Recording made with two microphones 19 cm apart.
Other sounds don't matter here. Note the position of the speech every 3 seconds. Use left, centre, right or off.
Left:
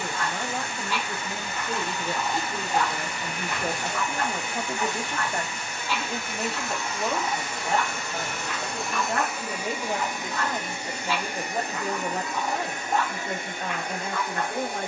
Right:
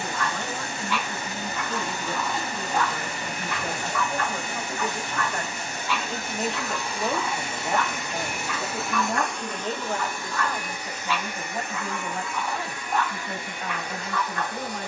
left, left, centre, left, left.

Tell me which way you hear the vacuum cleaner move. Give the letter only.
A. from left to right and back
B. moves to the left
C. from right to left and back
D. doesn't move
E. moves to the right
B.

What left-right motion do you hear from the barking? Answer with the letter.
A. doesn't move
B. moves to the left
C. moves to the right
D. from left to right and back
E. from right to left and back
A.